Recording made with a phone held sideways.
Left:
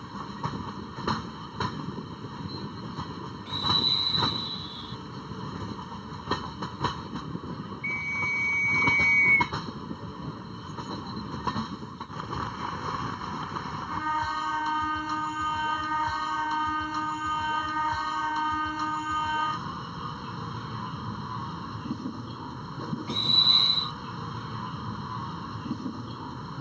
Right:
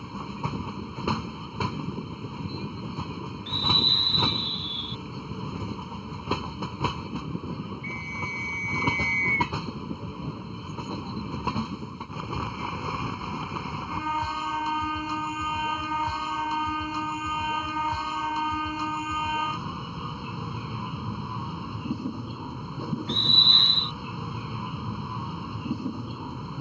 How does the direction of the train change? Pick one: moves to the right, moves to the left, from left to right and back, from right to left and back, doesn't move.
doesn't move.